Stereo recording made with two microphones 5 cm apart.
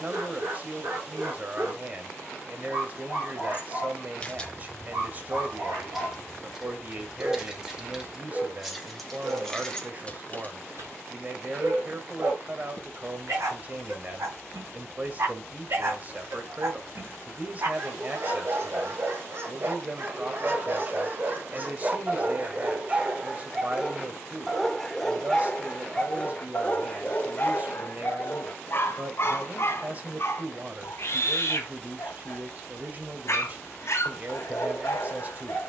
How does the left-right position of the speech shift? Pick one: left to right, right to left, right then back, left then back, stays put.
stays put.